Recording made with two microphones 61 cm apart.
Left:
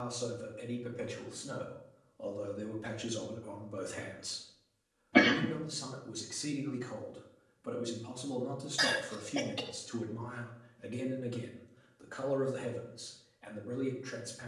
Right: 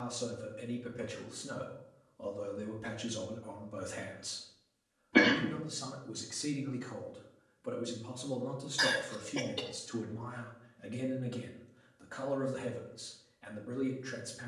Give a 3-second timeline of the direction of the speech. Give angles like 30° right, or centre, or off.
40° right, 20° right, 10° left, 10° right, 30° right.